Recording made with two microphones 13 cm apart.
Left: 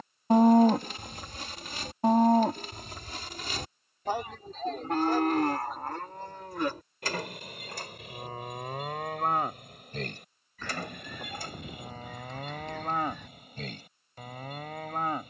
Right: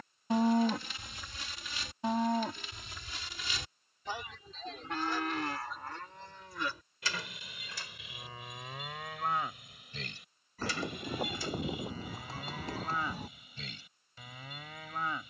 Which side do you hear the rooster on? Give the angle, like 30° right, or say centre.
30° right.